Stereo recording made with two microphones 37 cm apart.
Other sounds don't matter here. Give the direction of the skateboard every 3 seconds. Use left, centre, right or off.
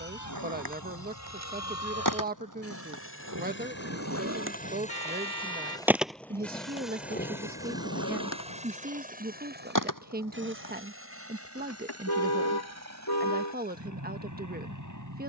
right, right, left, left, off.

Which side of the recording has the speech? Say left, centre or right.
right.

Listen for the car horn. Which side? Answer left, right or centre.
left.